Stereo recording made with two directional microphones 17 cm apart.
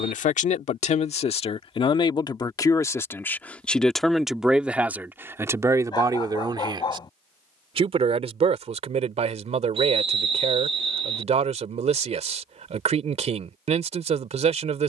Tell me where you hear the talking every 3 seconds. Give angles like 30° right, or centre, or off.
30° left, 10° right, 30° right, 40° right, 40° right.